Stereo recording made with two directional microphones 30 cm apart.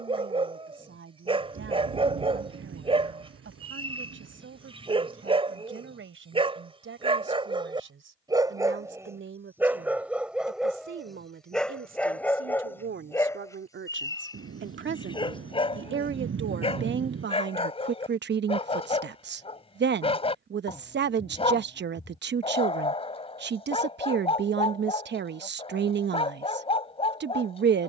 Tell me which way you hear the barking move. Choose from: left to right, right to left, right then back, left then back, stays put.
right to left.